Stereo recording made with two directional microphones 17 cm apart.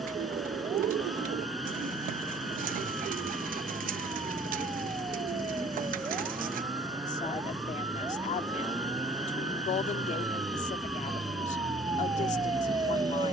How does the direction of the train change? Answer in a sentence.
In this clip you hear the train stay put.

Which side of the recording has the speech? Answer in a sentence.
In this clip you hear the speech on the left.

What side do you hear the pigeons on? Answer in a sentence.
You can hear the pigeons on the right.